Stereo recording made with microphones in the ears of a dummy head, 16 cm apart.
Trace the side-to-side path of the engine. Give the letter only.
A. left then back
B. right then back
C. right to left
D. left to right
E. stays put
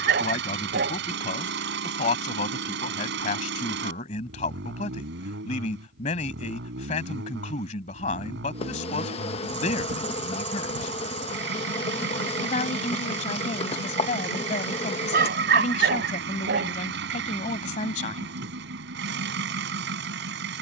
E.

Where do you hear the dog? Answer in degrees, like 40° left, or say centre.
50° right.